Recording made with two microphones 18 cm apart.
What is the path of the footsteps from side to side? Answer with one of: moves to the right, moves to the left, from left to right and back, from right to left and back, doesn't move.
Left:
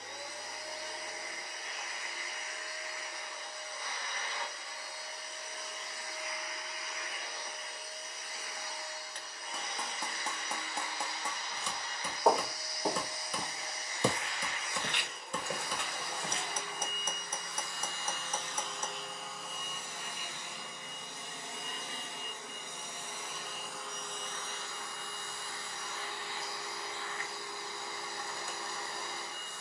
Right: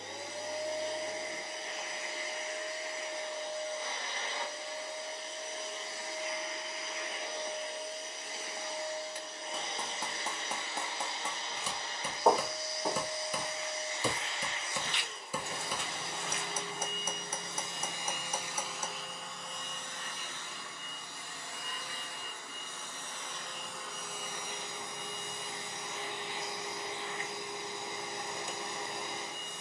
from right to left and back.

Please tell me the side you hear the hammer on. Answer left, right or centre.
centre.